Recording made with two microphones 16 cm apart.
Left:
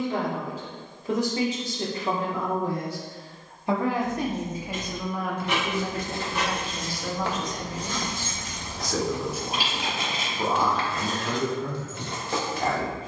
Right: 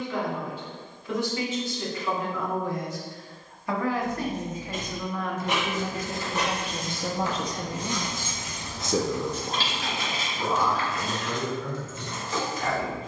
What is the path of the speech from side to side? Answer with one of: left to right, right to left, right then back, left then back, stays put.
right then back.